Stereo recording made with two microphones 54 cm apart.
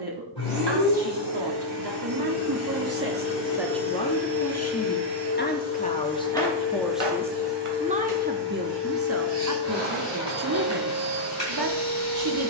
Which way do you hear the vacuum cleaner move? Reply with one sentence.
You can hear the vacuum cleaner stay in one place.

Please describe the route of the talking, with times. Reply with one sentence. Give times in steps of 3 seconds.
You can hear the talking on the right from 0 s, in the centre from 3 s and on the right from 9 s.